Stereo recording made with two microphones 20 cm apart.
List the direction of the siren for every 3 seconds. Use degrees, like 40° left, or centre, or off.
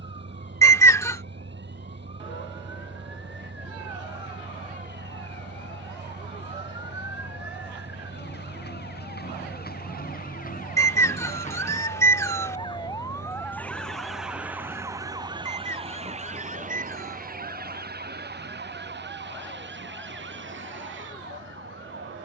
70° left, 70° left, 60° left, 40° left, 10° left, 40° right, 60° right, 70° right.